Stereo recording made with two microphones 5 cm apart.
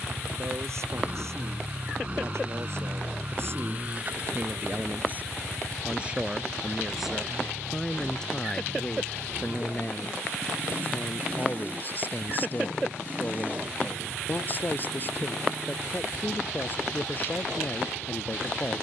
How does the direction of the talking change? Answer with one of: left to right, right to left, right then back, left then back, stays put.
right to left.